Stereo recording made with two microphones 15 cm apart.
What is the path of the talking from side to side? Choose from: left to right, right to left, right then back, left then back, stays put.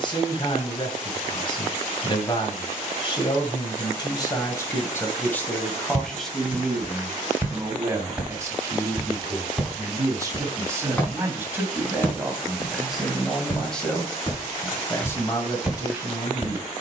right then back.